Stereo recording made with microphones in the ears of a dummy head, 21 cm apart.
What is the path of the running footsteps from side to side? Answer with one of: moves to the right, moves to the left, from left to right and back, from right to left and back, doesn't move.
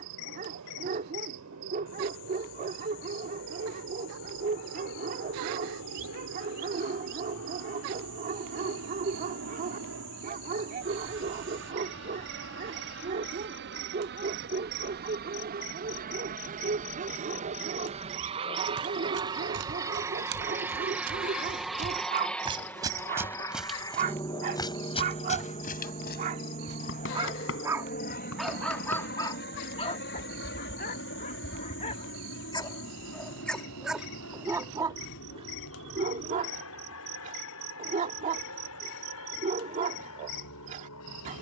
moves to the left.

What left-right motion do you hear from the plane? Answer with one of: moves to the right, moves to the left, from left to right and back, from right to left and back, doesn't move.
moves to the left.